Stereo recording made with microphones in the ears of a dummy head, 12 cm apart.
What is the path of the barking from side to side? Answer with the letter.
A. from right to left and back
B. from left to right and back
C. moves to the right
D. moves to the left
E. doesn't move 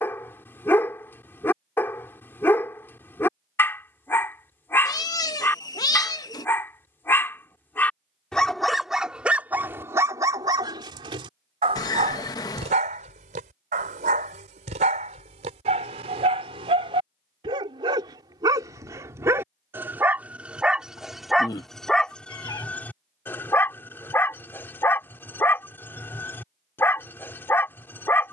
B.